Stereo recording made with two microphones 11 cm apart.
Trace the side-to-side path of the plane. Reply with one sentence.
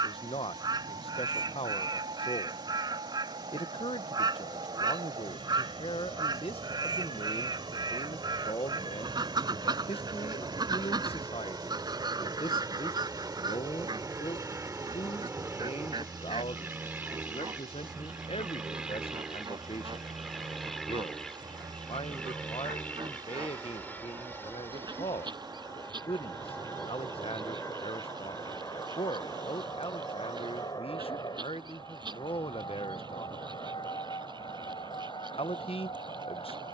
In this clip you hear the plane travel towards the left.